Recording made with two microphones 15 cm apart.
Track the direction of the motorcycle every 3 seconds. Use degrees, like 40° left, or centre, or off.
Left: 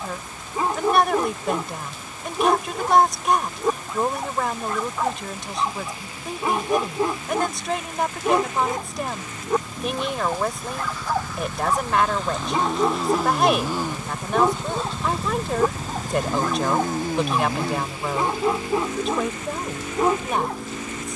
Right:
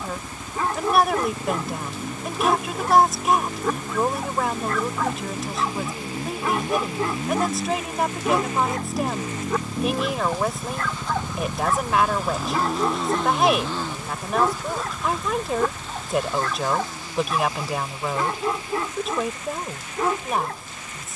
60° right, 50° right, 50° right, 30° right, 10° left, 40° left, 60° left.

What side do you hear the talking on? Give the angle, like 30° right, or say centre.
centre.